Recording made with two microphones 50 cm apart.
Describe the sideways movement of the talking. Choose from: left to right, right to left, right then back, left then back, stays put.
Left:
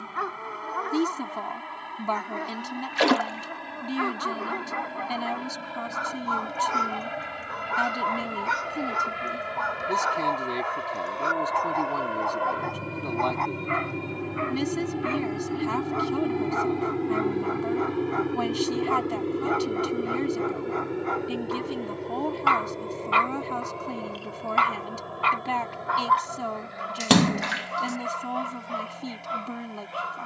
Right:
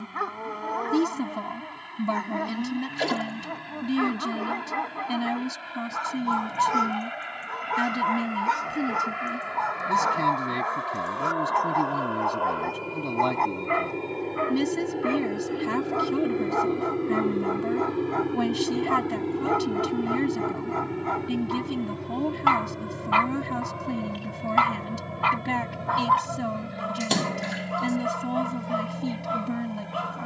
stays put.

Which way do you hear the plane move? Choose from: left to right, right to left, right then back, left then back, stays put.
left to right.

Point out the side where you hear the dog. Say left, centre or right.
right.